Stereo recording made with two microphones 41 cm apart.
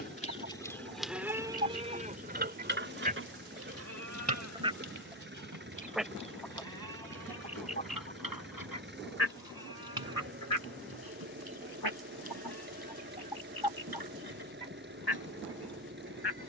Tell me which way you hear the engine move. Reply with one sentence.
You can hear the engine stay put.